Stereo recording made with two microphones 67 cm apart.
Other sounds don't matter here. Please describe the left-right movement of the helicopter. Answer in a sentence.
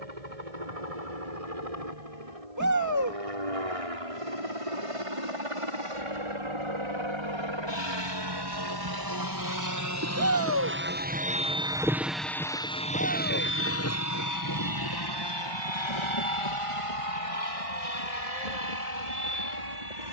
In this clip you hear the helicopter move to the left.